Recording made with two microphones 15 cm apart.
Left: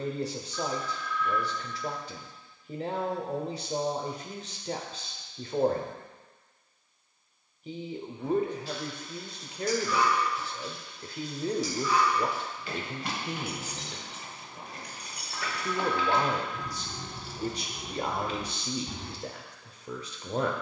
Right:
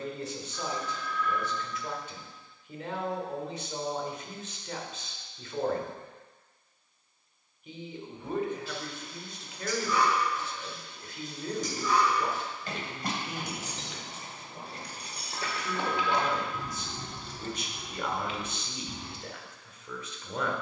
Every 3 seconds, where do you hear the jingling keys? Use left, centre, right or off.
off, off, right, right, right, centre, left.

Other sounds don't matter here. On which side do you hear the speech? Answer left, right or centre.
left.